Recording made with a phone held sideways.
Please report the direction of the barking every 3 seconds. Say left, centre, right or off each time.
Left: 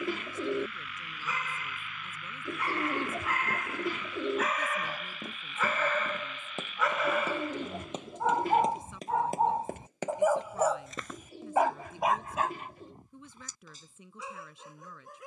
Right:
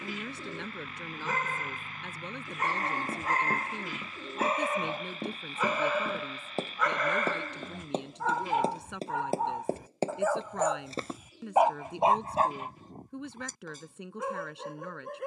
right, right, centre, centre, right.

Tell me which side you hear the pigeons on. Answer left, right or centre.
left.